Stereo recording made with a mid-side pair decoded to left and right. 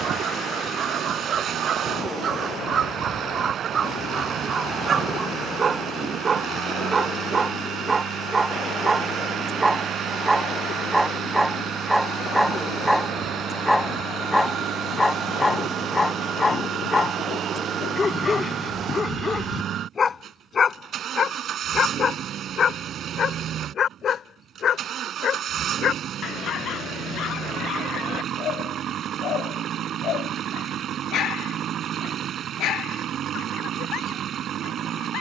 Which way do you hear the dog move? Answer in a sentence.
You can hear the dog move from right to left.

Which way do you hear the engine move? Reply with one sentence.
In this clip you hear the engine stay in one place.